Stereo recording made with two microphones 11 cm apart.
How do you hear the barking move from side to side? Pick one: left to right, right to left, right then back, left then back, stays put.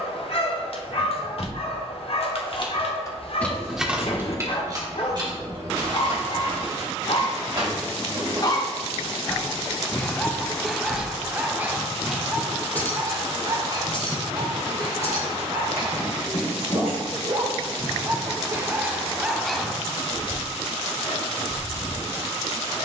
right then back.